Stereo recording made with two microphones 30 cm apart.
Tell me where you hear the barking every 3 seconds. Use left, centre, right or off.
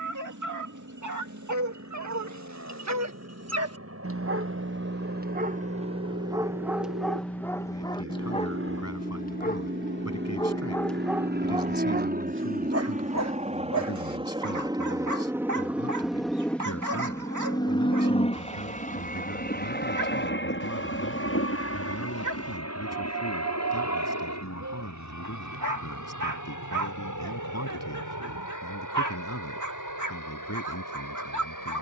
right, right, centre, centre, right, right, right, right, right, right, right.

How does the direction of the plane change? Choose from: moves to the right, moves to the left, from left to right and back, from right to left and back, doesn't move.
moves to the left.